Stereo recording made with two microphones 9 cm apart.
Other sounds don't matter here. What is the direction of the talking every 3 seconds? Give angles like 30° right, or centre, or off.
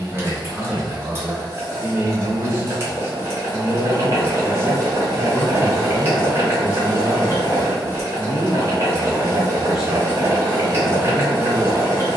20° right, 20° left, 30° left, 10° right.